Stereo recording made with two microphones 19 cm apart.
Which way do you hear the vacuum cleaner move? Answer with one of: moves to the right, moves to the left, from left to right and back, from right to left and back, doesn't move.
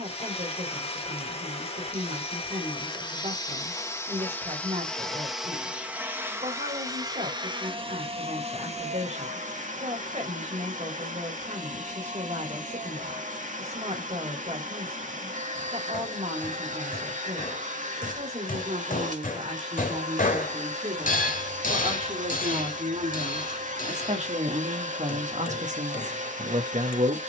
moves to the right.